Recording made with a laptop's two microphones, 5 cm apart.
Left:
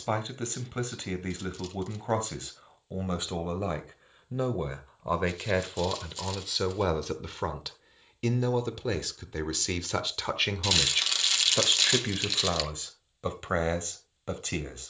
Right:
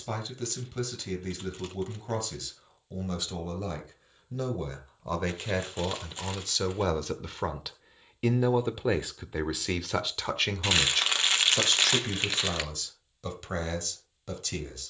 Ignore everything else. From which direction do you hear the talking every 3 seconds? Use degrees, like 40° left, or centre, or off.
30° left, 20° left, centre, centre, 30° left.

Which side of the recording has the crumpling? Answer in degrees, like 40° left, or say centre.
30° right.